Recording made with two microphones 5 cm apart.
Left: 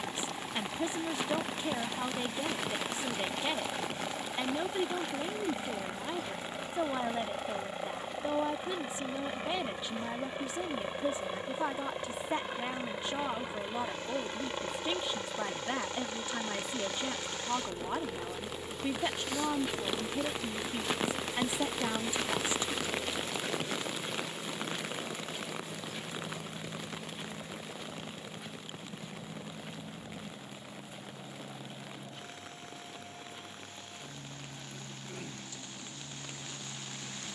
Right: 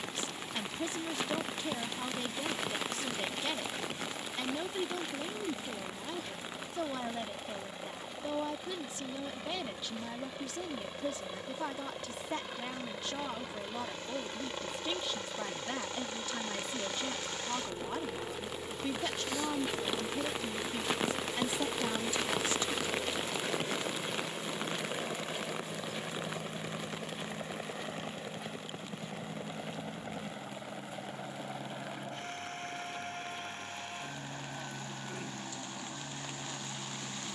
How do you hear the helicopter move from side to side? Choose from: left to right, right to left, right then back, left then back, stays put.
left to right.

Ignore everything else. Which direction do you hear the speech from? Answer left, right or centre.
left.